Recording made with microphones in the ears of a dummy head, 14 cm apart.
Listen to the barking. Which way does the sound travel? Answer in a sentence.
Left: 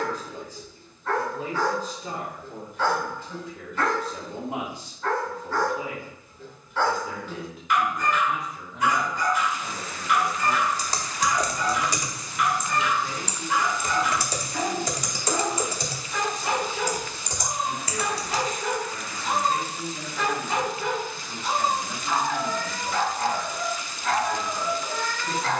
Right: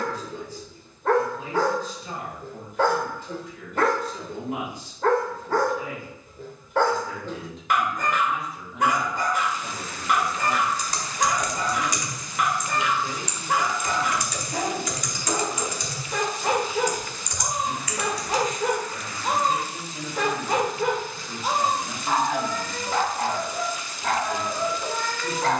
You can hear the barking stay put.